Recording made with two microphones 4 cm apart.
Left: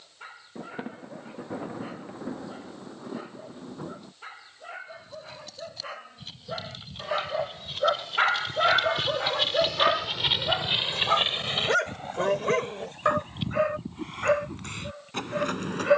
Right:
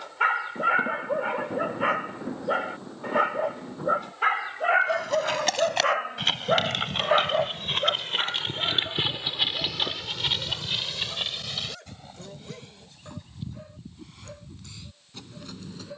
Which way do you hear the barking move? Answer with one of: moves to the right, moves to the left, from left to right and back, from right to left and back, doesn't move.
moves to the left.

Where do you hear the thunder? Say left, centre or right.
centre.